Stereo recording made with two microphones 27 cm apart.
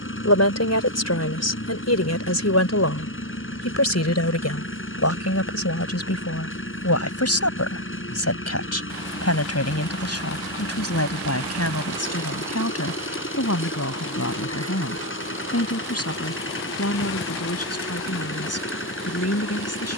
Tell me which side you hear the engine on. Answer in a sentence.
You can hear the engine on the left.